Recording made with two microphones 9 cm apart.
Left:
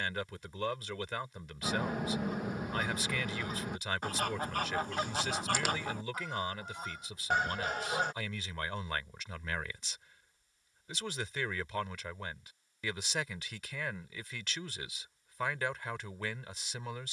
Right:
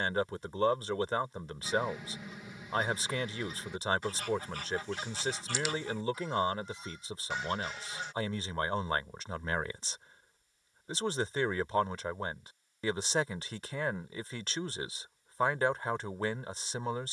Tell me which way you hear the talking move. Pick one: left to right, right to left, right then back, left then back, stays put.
stays put.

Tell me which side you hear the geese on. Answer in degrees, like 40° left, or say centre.
50° left.